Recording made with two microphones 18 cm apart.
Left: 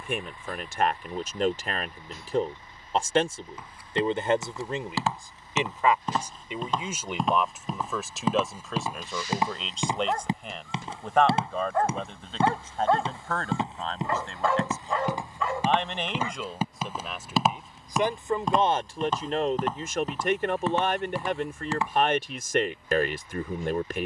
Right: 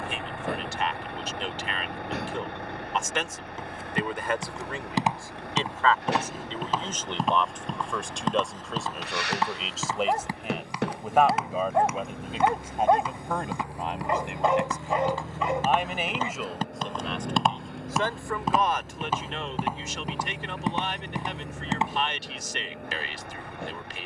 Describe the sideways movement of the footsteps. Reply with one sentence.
In this clip you hear the footsteps move from right to left and back again.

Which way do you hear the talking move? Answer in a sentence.
In this clip you hear the talking go right and come back.